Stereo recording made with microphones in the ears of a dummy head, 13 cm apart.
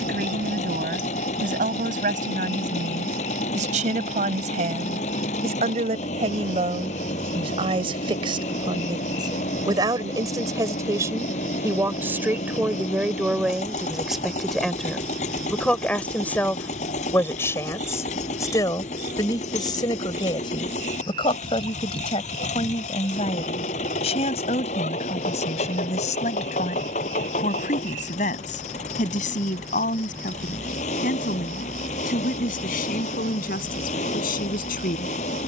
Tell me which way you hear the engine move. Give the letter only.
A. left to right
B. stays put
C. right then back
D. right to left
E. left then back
B.